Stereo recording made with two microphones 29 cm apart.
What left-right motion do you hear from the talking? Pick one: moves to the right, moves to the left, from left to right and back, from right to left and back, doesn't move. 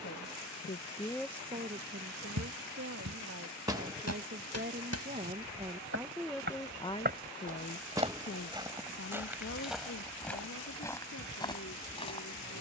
from left to right and back.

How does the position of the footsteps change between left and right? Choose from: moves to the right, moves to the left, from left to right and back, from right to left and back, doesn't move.
moves to the left.